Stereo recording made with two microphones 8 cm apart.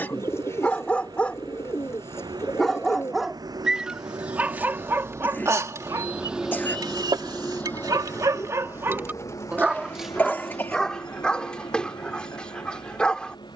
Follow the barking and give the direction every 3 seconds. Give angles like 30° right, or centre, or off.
10° left, 20° right, 50° right, centre, 10° left.